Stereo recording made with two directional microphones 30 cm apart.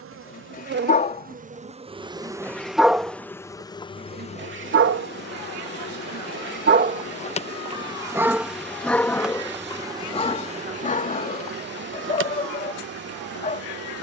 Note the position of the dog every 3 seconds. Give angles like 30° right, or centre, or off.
20° left, 40° right, 20° right, 20° left, 30° left.